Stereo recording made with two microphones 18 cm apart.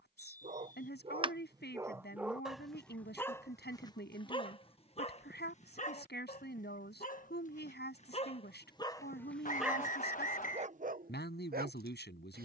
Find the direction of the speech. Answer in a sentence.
You can hear the speech on the left.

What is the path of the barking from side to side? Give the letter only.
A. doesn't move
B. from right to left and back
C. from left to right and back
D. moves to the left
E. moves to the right
B.